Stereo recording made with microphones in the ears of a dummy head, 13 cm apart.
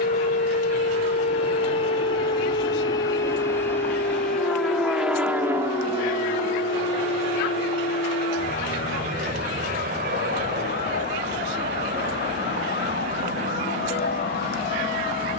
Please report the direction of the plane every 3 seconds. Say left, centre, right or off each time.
left, centre, right, right, right.